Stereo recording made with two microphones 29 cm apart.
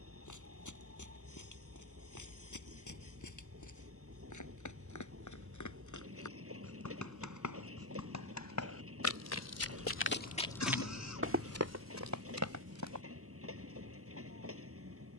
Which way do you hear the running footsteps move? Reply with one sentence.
You can hear the running footsteps travel towards the right.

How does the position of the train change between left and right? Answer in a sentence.
You can hear the train stay put.